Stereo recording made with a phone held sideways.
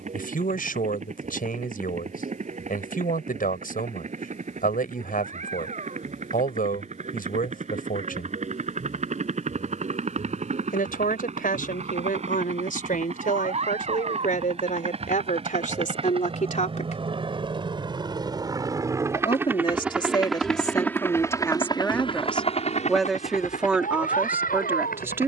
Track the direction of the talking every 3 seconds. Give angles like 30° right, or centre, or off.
80° left, 80° left, 80° left, 80° left, 70° left, 60° left, 30° left, 10° left, 10° right.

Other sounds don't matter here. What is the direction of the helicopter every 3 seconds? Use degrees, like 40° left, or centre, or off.
60° right, 60° right, 60° right, 60° right, 50° right, 40° right, 10° right, 40° left, 70° left.